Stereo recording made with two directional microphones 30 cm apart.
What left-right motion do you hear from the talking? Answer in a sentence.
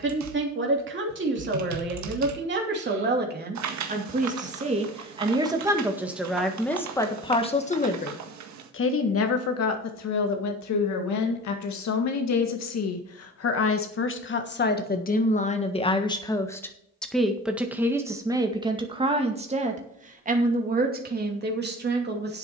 In this clip you hear the talking move from right to left and back again.